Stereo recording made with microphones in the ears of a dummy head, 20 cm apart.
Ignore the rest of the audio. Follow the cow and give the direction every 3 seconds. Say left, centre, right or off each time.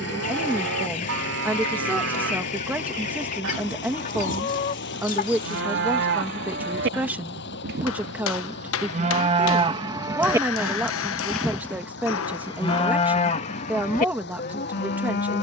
right, right, right, centre, left.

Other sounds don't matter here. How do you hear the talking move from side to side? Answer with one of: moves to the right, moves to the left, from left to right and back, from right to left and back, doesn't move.
doesn't move.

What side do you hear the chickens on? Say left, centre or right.
left.